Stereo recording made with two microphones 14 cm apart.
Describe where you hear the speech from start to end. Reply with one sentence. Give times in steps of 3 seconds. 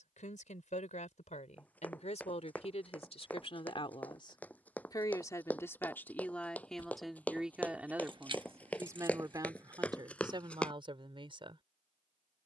You can hear the speech on the left from 0 s, in the centre from 6 s and on the right from 9 s.